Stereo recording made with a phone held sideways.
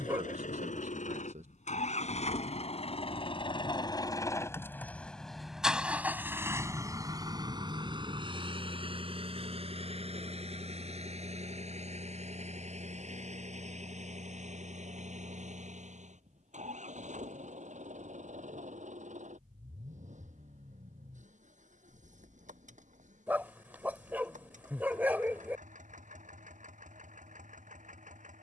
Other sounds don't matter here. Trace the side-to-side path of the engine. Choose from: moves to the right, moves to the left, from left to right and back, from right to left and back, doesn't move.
moves to the right.